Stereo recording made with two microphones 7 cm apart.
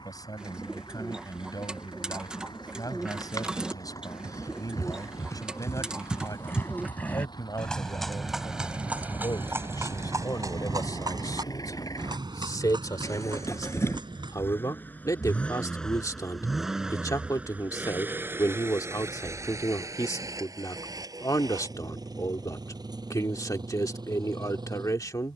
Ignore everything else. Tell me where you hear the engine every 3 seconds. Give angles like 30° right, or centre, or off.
80° left, 80° left, 70° left, 60° left, 40° left, centre, 40° right, 60° right, 70° right.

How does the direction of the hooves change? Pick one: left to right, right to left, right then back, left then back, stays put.
left to right.